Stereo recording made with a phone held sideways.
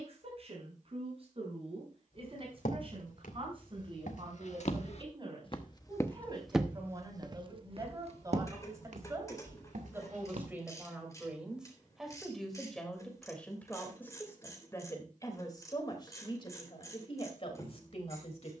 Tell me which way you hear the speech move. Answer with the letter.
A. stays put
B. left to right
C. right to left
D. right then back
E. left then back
C.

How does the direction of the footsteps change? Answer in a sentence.
You can hear the footsteps move from left to right.